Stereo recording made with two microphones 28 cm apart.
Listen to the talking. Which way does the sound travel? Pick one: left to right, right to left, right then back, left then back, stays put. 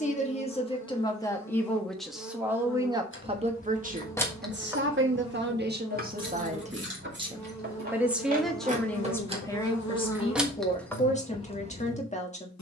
right then back.